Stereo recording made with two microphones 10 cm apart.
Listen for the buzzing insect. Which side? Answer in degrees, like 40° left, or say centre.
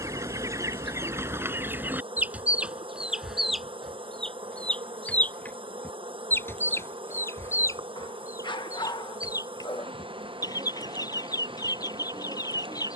70° right.